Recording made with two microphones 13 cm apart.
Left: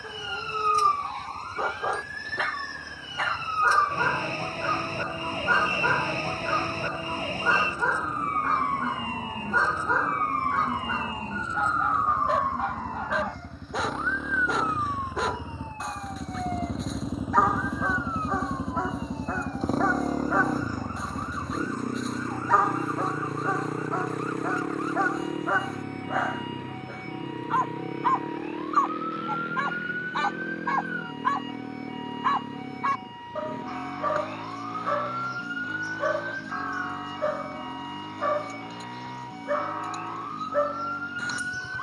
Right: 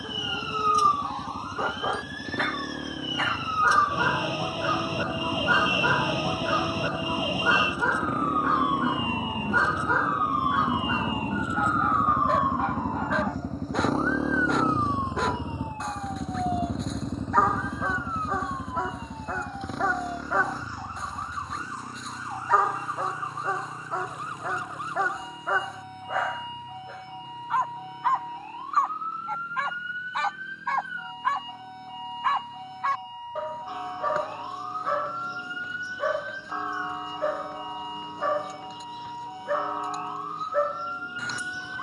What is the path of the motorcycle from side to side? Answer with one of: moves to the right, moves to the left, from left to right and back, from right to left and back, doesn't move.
moves to the left.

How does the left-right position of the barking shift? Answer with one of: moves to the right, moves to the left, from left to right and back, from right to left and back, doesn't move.
doesn't move.